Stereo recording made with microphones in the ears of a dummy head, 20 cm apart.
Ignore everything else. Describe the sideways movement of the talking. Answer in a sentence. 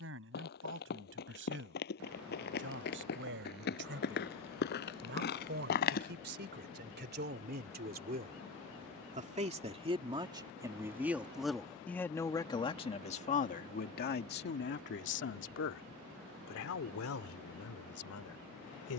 In this clip you hear the talking move to the left.